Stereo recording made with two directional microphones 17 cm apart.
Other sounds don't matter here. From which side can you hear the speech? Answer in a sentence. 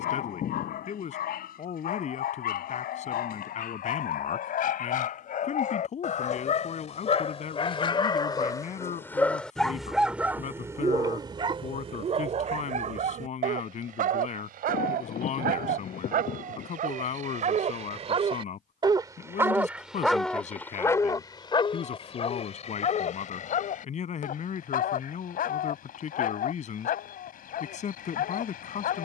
In this clip you hear the speech on the left.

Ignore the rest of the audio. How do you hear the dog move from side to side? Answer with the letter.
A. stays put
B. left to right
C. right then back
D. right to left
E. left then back
C.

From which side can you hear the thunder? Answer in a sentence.
You can hear the thunder on the left.